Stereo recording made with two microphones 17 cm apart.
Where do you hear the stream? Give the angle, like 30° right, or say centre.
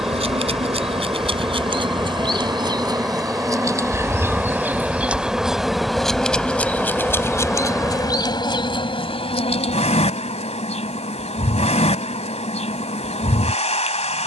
centre.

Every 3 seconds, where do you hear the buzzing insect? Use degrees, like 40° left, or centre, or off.
30° right, 10° right, 20° left, 40° left, 40° left.